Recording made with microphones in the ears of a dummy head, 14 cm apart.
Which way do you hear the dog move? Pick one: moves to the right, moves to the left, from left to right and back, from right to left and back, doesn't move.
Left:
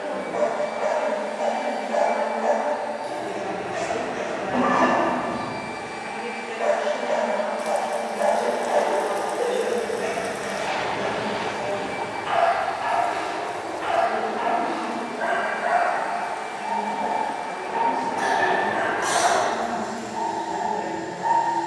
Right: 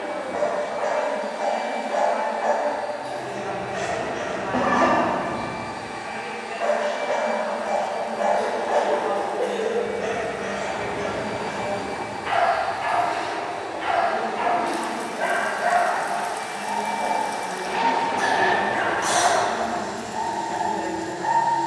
moves to the right.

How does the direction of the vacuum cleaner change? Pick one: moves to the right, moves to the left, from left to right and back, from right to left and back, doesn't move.
moves to the right.